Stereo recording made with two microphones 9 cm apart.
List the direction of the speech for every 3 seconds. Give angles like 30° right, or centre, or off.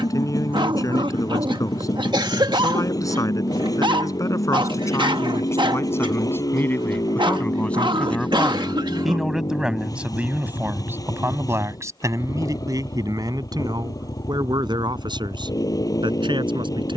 40° left, 40° left, 20° left, 20° right, 50° right, 60° right.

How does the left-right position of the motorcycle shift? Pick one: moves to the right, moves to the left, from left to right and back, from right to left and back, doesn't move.
doesn't move.